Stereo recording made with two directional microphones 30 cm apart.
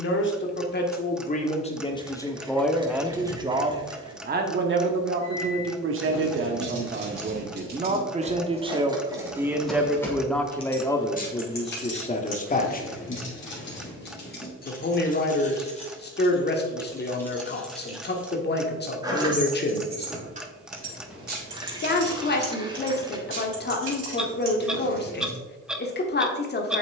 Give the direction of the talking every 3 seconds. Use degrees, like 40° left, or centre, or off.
20° left, 30° right, 30° right, 10° left, 30° left, 30° left, 30° left, 30° left, 30° left.